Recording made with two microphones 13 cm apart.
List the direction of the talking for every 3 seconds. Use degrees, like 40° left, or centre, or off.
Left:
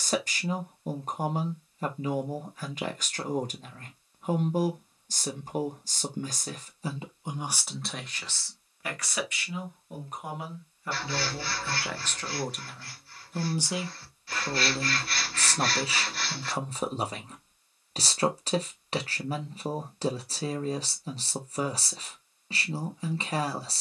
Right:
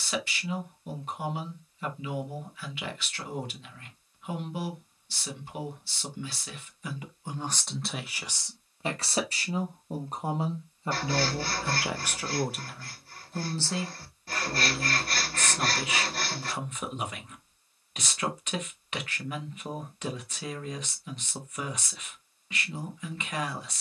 40° left, 40° left, 10° left, 30° right, 10° left, 30° left, 30° left, 30° left.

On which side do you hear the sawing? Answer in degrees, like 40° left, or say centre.
40° right.